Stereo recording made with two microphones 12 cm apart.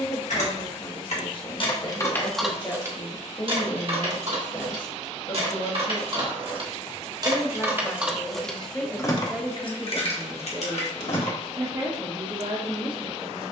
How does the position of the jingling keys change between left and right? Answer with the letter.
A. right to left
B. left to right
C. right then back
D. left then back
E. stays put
C.